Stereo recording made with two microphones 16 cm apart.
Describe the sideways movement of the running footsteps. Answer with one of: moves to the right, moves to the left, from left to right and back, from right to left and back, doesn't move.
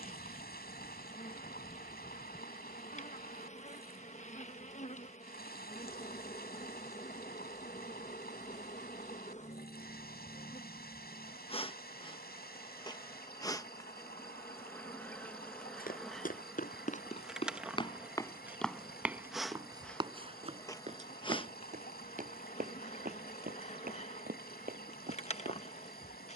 moves to the right.